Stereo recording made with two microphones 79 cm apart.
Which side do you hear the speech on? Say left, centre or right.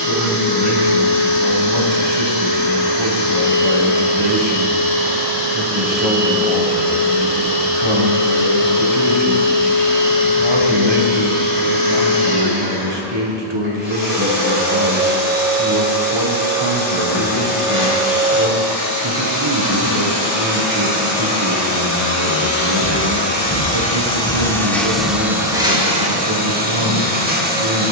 right.